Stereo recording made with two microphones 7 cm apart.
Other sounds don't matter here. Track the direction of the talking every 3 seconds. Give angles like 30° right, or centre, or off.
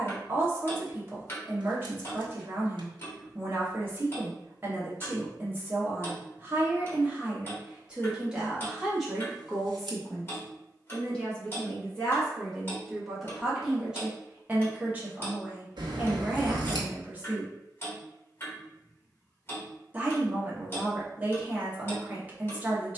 30° right, 30° right, 20° right, 10° left, 10° right, 20° right, 20° right, 20° right.